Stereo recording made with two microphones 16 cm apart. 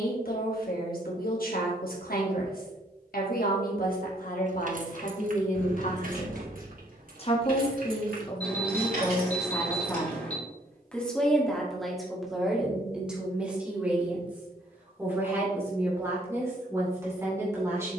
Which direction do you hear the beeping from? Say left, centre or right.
centre.